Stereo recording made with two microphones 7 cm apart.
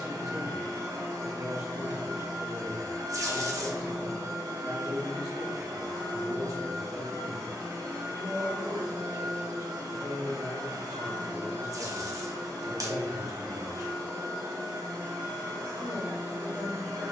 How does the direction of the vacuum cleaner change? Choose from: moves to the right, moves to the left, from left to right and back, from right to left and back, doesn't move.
doesn't move.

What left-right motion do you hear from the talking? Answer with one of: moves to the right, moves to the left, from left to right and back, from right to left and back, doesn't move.
doesn't move.